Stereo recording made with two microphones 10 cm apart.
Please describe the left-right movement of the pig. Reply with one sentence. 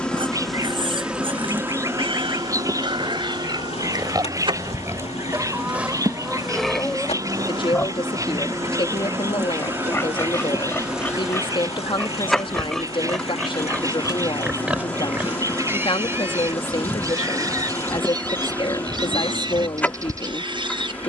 In this clip you hear the pig move from right to left and back again.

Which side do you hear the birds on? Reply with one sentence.
You can hear the birds on the right.